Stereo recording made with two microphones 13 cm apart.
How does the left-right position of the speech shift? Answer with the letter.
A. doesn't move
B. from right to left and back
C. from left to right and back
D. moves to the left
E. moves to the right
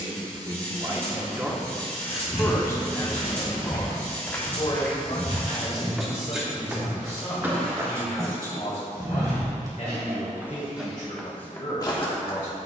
D.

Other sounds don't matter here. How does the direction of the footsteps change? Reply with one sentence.
In this clip you hear the footsteps go right and come back.